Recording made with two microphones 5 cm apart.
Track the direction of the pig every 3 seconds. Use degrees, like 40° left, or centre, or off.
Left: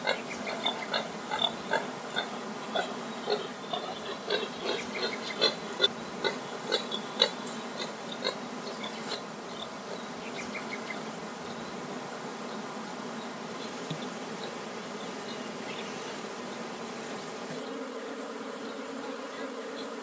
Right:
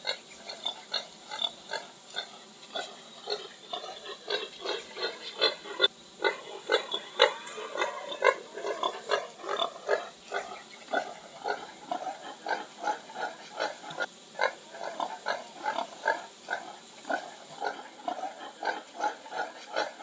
20° left, centre, 40° right, 70° right, 80° right, 80° right, 80° right.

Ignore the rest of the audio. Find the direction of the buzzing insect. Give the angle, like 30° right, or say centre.
80° left.